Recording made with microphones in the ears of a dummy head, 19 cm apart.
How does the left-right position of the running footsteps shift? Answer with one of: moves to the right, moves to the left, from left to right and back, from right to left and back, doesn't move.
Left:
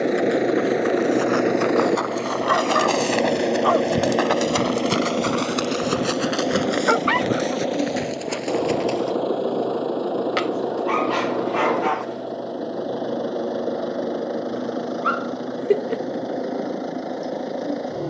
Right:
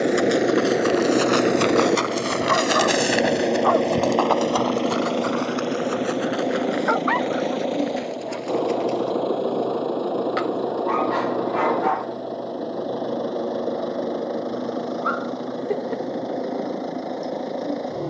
moves to the left.